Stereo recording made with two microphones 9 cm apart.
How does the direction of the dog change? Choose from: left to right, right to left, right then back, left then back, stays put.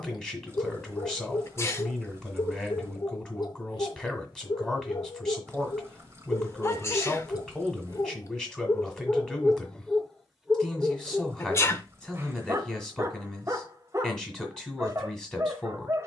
left to right.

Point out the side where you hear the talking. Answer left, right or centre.
centre.